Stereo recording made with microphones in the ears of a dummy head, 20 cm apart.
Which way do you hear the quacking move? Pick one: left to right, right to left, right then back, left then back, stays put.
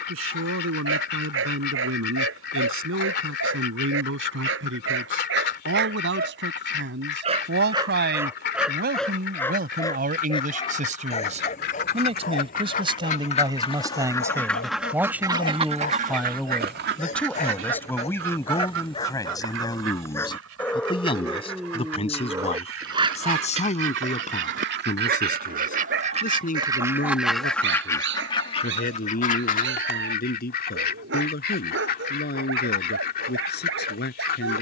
right then back.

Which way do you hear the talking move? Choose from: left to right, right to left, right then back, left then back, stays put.
right to left.